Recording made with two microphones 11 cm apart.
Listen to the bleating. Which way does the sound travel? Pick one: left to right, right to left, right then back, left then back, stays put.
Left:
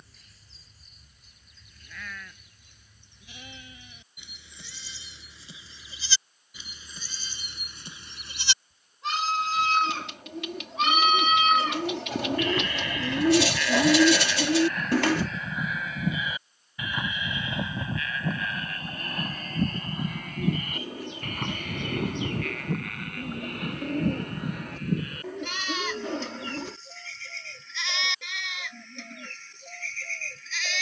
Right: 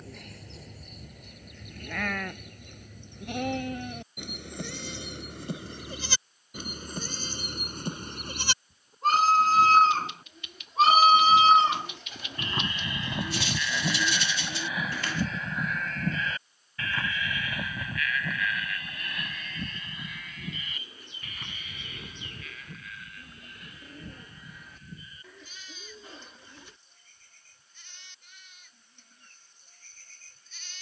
right to left.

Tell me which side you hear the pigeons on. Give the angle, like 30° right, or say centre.
60° left.